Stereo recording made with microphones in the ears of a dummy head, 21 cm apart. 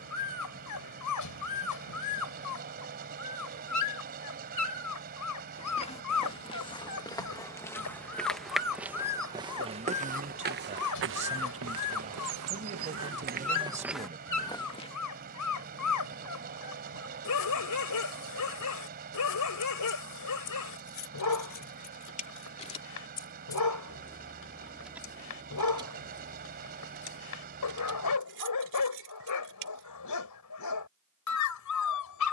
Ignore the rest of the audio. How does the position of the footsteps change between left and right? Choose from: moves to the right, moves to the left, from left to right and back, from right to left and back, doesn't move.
from left to right and back.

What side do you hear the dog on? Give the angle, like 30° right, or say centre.
80° left.